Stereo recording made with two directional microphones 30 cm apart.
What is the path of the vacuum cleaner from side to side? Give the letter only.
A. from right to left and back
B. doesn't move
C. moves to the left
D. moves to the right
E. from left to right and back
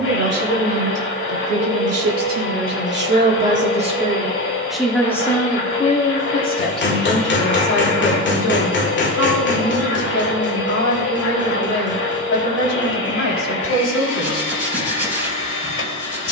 B.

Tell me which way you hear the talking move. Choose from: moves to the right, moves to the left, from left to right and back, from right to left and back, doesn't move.
moves to the left.